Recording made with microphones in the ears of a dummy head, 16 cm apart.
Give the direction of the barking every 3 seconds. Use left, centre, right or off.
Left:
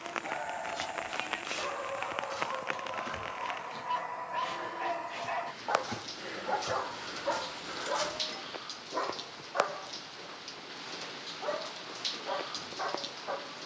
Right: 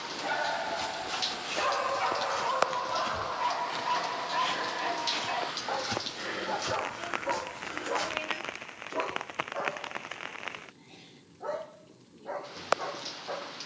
right, centre, left, left, left.